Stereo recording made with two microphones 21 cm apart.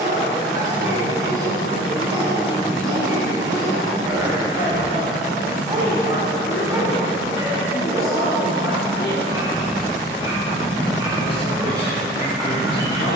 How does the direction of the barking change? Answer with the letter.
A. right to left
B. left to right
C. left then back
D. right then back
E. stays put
E.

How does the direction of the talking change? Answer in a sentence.
You can hear the talking stay in one place.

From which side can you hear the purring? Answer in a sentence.
In this clip you hear the purring on the left.